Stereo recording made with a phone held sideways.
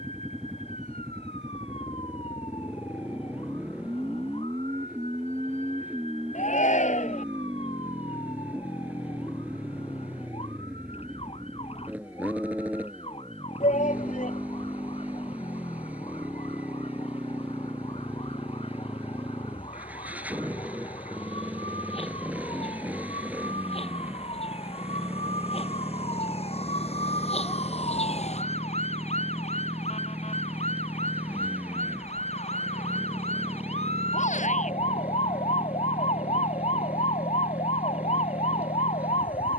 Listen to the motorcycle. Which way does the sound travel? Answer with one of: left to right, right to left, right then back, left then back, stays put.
stays put.